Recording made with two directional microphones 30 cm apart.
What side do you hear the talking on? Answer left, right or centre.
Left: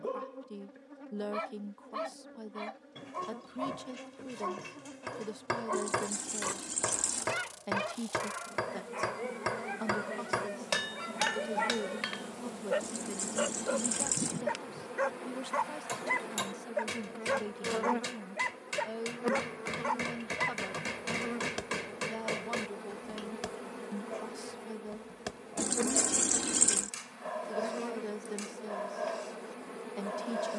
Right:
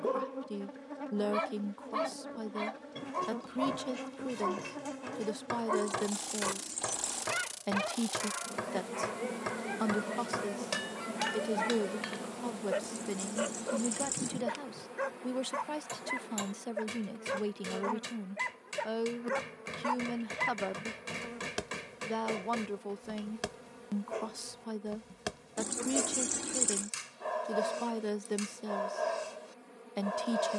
right.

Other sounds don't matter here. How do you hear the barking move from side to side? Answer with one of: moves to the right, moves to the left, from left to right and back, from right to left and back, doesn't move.
from right to left and back.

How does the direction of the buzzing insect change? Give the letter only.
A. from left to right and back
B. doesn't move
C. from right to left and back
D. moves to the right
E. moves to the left
E.